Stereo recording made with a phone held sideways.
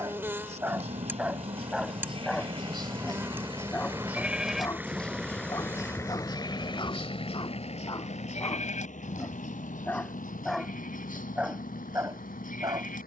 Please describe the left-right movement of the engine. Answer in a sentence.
You can hear the engine move from right to left.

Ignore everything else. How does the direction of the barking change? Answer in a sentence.
In this clip you hear the barking go left and come back.